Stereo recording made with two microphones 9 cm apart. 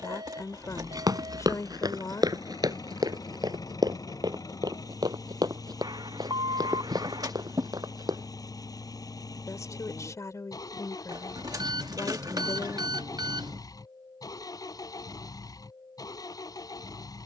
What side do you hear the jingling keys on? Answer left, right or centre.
right.